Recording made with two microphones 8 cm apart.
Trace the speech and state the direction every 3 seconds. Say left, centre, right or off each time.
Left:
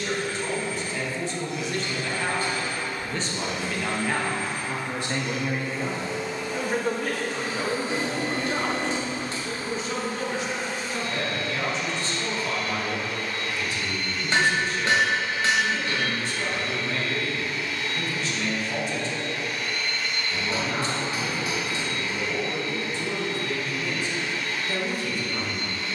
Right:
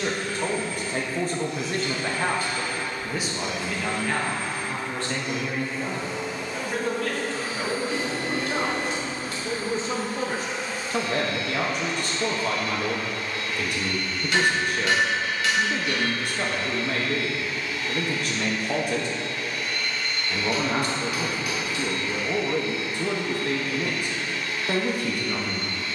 right, centre, centre, right, right, right, right, right, right.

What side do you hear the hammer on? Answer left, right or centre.
left.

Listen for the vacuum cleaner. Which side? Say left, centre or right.
left.